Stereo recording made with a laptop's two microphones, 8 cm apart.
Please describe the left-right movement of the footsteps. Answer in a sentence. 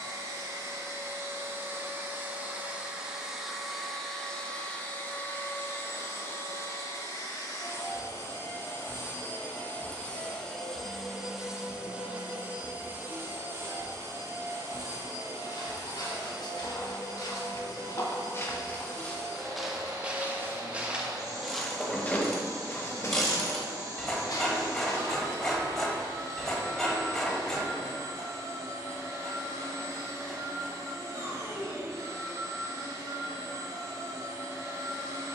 In this clip you hear the footsteps move from left to right and back again.